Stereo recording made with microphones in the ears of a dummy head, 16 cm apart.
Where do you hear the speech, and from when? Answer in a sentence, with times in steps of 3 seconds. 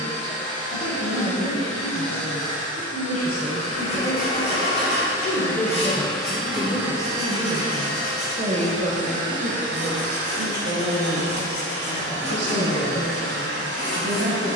In this clip you hear the speech on the left from 0 s, in the centre from 6 s and on the right from 9 s.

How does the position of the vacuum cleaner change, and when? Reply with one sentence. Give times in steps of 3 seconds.
In this clip you hear the vacuum cleaner on the left from 0 s and on the right from 6 s.